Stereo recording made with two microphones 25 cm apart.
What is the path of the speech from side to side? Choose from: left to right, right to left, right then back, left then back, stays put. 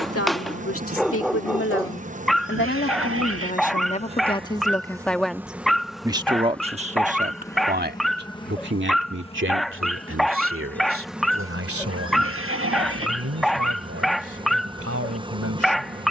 left to right.